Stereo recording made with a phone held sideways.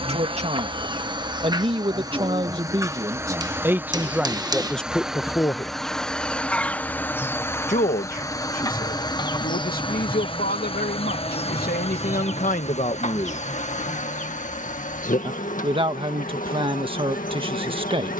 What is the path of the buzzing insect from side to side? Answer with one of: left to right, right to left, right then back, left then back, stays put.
right to left.